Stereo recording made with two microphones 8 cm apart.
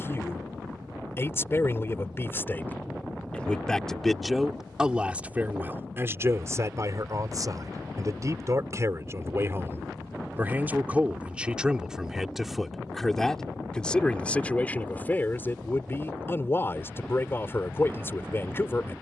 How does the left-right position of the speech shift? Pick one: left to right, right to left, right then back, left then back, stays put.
right then back.